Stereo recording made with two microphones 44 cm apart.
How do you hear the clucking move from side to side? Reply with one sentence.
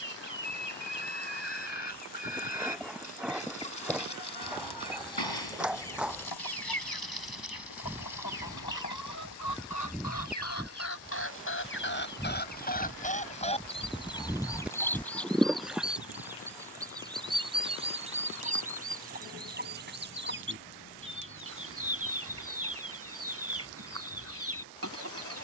You can hear the clucking go from the left side to the right.